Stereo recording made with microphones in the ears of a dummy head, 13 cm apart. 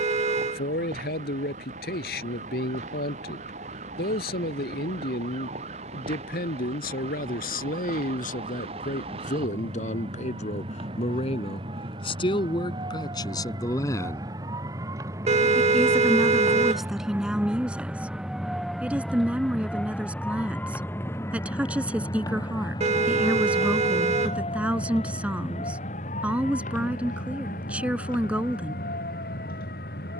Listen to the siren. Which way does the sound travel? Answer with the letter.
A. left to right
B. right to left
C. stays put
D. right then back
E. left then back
B.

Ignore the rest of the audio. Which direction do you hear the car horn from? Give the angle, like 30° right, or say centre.
40° right.